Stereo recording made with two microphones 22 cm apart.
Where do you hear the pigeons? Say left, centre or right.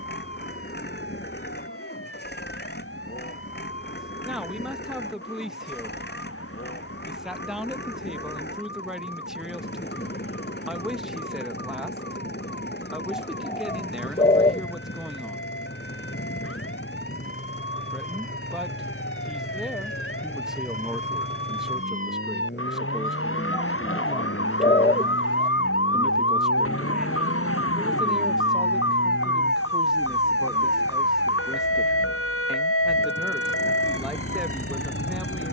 left.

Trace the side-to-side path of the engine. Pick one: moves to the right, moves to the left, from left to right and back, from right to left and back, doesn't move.
doesn't move.